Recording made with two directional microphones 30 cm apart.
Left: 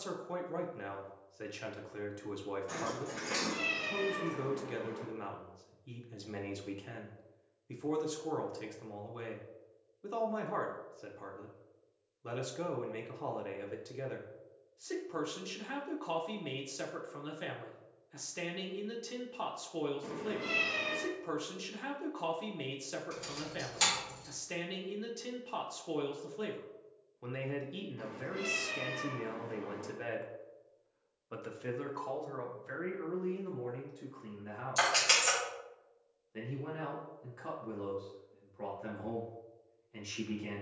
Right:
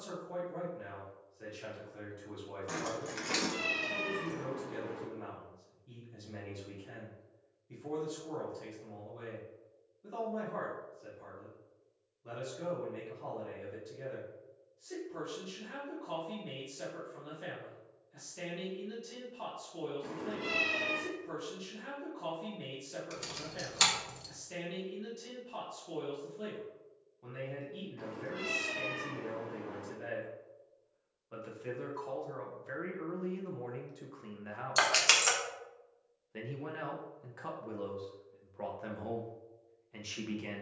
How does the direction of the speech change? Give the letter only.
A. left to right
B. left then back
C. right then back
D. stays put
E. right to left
A.